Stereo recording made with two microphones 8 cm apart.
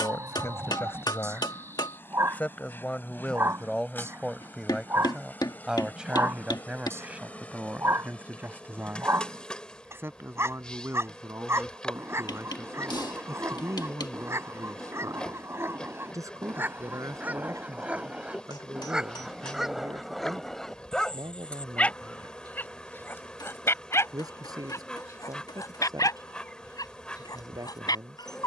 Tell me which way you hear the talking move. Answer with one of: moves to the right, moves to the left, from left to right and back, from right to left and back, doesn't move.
moves to the right.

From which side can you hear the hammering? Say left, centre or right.
left.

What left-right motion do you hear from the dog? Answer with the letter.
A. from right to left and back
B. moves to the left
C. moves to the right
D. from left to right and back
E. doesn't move
B.